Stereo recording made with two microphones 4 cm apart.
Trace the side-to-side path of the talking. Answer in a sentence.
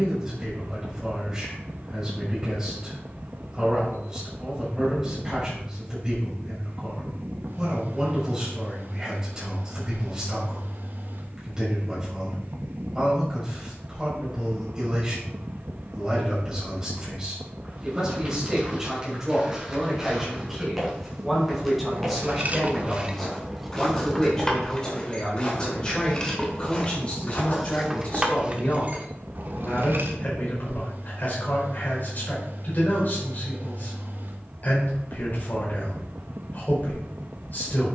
You can hear the talking move from right to left.